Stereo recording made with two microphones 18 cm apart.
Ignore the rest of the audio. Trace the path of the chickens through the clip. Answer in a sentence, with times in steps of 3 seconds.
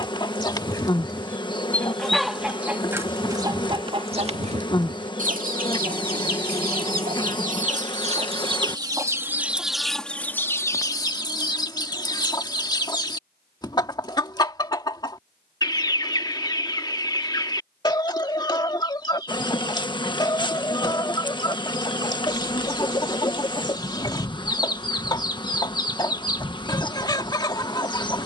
In this clip you hear the chickens in the centre from 0 s, on the right from 3 s, in the centre from 9 s and on the left from 12 s.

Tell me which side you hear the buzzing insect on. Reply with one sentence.
In this clip you hear the buzzing insect on the left.